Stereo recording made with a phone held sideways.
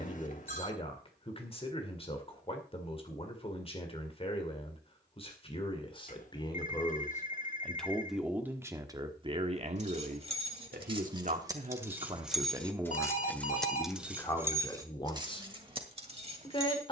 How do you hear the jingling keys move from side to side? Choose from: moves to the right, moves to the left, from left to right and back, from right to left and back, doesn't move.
from right to left and back.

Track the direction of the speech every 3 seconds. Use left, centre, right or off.
left, left, centre, right, centre, left.